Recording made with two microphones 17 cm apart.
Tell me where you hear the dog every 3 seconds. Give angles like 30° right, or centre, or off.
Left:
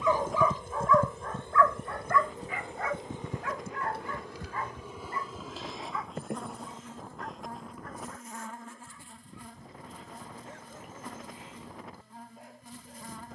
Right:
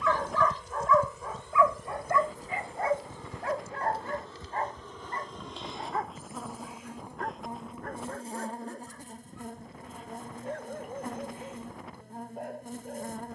10° right, 50° right, 60° right, 60° right, 60° right.